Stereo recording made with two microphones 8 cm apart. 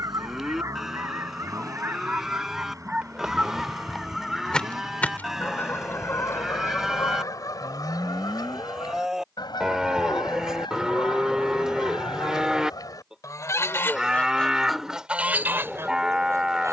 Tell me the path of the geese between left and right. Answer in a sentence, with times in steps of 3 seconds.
In this clip you hear the geese on the right from 0 s, in the centre from 3 s, on the left from 6 s and on the right from 15 s.